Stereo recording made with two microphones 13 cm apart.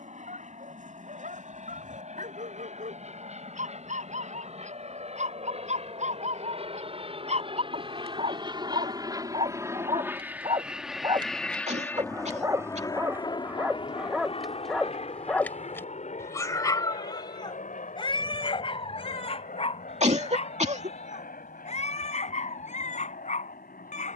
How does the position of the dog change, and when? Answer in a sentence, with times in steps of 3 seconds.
In this clip you hear the dog on the right from 0 s, in the centre from 12 s and on the left from 15 s.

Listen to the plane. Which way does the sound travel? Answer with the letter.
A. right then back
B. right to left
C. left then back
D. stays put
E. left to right
B.